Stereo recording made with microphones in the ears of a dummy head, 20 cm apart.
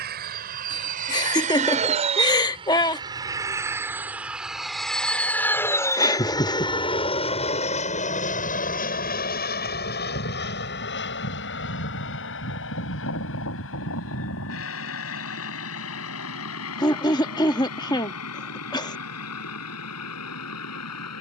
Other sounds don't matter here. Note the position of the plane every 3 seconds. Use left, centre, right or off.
right, centre, left, left, left, left, left.